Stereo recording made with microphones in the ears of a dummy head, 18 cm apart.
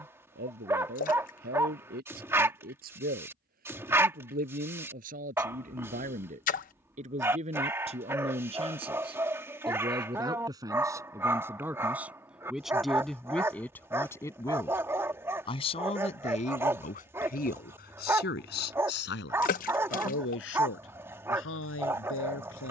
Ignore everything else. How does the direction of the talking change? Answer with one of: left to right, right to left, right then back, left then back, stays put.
right to left.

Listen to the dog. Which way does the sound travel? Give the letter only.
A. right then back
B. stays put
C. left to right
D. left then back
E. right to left
B.